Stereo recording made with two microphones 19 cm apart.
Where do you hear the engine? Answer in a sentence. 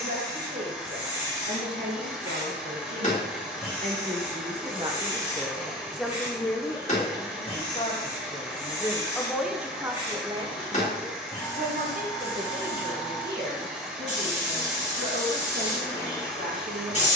You can hear the engine in the centre.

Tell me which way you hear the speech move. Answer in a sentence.
You can hear the speech go left and come back.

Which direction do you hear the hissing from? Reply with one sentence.
In this clip you hear the hissing on the left.